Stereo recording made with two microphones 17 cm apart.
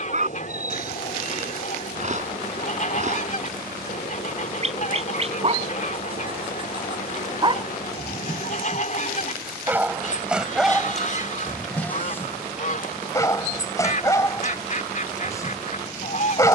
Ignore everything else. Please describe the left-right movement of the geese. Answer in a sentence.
You can hear the geese stay put.